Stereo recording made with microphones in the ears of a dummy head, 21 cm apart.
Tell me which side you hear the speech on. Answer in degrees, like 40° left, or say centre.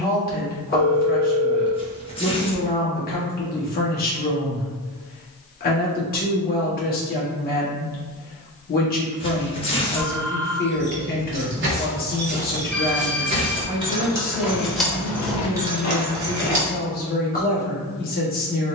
40° left.